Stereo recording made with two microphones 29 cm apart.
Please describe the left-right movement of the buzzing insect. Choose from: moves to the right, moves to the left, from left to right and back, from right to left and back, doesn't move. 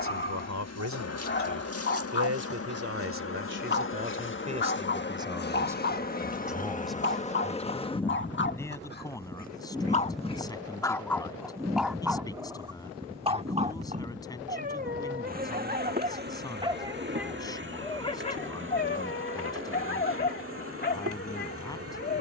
moves to the right.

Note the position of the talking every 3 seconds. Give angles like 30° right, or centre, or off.
60° right, 30° right, centre, 10° left, 10° left, 10° left, 10° left, 10° left.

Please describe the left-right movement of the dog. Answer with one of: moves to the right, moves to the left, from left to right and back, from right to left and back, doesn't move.
from left to right and back.